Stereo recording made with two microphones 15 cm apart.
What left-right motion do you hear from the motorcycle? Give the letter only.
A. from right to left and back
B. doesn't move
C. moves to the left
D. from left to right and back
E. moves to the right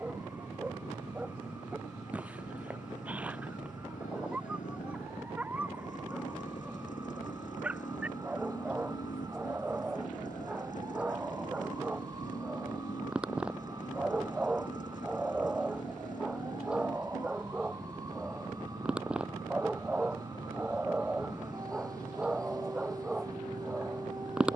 B.